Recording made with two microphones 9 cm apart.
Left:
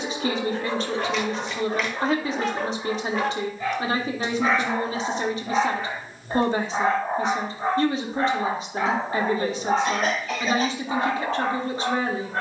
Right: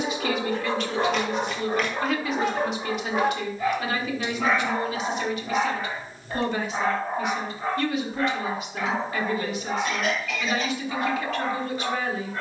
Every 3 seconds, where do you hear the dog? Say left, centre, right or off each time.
right, centre, left, left.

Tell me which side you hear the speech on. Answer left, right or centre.
left.